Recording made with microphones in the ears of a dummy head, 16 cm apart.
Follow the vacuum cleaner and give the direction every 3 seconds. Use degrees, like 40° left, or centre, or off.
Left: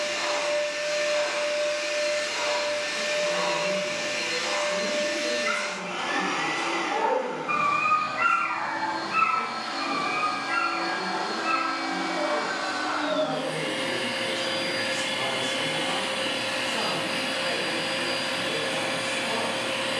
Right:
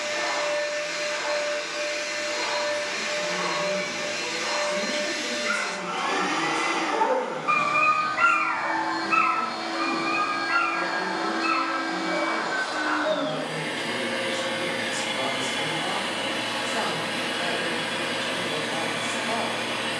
30° left, 10° left, 20° right, 20° left, 30° left, 30° left, 30° left.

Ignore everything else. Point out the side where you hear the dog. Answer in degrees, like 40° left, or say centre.
40° right.